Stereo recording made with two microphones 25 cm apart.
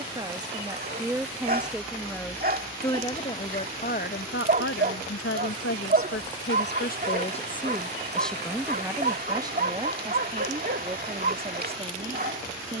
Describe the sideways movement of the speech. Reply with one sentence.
You can hear the speech move from right to left and back again.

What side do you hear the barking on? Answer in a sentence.
You can hear the barking on the right.